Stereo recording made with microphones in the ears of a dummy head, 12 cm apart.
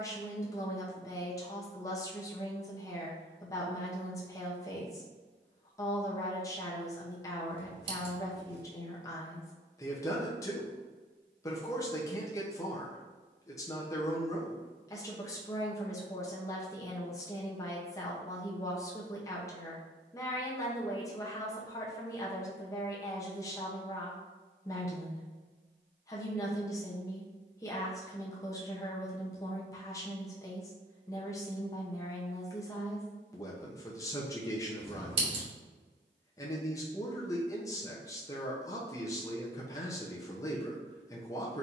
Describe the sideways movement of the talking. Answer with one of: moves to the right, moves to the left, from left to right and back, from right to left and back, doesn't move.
doesn't move.